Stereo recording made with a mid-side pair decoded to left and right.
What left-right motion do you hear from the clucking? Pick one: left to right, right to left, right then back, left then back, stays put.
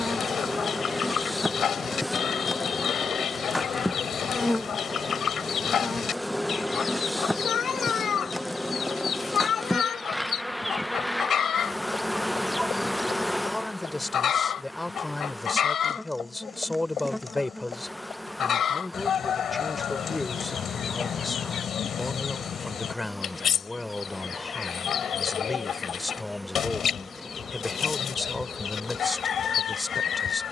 stays put.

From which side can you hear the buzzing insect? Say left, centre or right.
centre.